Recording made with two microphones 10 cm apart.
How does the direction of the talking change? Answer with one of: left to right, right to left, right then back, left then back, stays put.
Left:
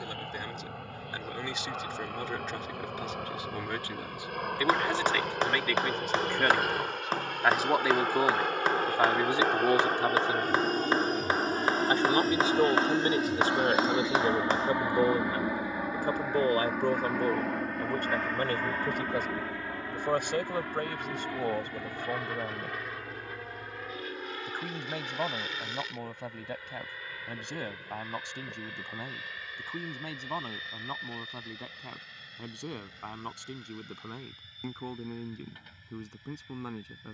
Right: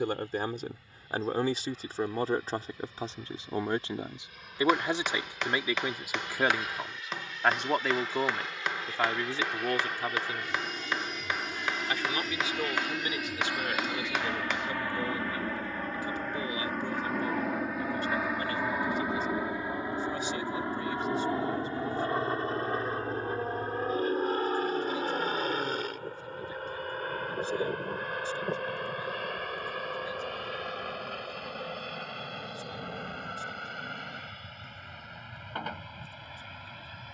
right to left.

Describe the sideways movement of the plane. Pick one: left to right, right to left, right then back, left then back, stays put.
left to right.